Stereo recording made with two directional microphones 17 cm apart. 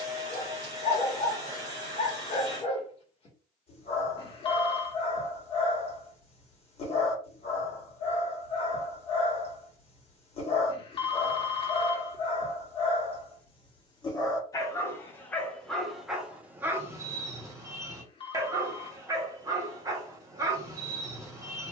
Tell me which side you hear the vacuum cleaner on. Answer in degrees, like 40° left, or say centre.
20° right.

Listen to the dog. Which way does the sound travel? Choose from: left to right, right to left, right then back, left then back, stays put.
left to right.